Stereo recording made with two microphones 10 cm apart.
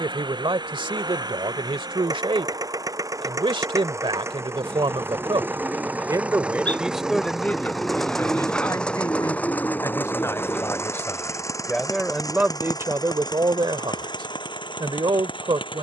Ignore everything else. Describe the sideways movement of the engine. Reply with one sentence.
In this clip you hear the engine go from the right side to the left.